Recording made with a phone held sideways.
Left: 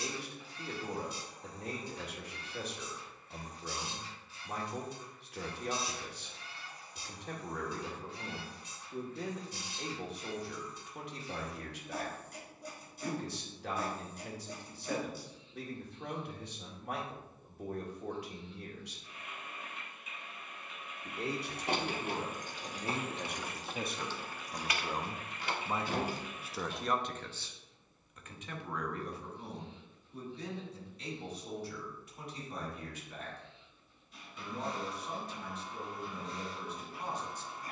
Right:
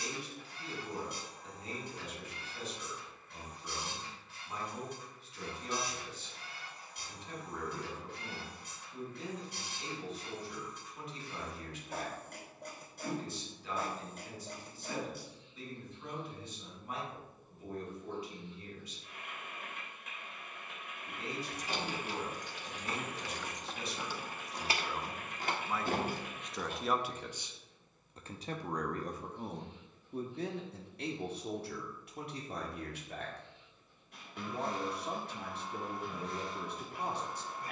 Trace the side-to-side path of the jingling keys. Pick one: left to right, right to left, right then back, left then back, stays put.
left to right.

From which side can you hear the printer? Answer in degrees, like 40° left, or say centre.
60° right.